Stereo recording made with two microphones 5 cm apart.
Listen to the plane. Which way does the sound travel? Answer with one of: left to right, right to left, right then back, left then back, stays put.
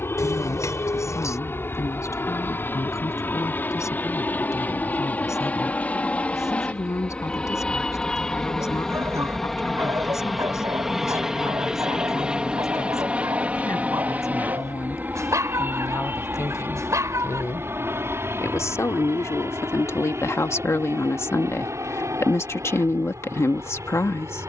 left to right.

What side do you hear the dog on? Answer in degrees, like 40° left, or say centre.
80° right.